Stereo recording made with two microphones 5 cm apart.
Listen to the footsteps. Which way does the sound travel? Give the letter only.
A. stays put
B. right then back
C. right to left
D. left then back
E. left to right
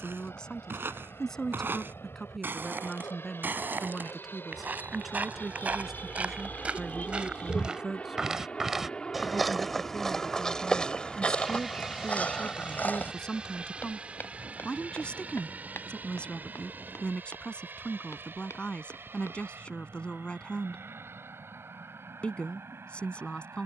C.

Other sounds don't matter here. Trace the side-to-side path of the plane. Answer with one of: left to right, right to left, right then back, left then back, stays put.
left to right.